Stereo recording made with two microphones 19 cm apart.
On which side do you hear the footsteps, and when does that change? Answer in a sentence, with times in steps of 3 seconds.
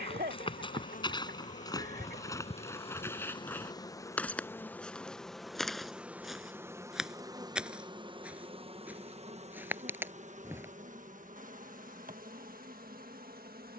You can hear the footsteps on the left from 0 s, in the centre from 3 s and not at all from 12 s.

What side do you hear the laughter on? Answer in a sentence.
In this clip you hear the laughter on the right.